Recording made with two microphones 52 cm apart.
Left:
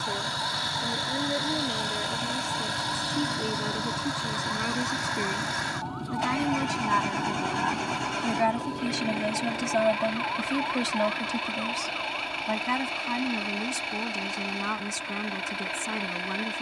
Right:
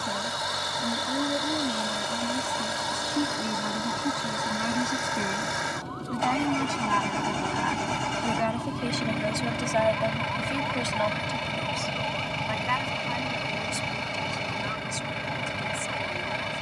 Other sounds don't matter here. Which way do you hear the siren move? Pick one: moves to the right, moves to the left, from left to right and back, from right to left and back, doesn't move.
moves to the right.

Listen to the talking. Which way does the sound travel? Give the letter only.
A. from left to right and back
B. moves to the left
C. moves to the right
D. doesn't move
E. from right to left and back
B.